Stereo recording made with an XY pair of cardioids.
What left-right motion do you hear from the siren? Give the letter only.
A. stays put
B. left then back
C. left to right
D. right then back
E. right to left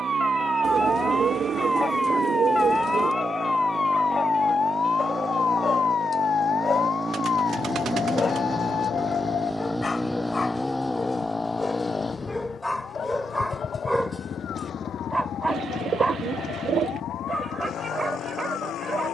E.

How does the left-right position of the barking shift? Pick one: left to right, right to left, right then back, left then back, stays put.
left to right.